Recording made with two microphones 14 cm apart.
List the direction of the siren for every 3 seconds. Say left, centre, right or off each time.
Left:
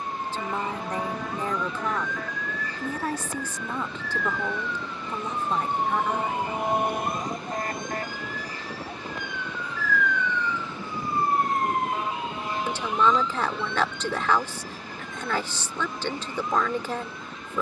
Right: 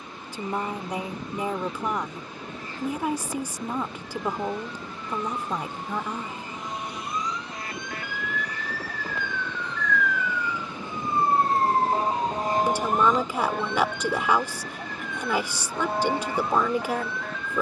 left, left, left, centre, right, right.